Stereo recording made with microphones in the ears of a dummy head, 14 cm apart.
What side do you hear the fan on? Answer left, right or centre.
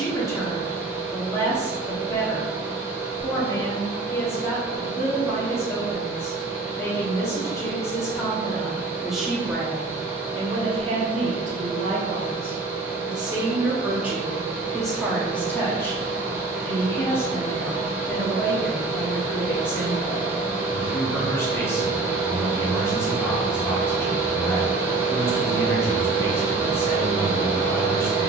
centre.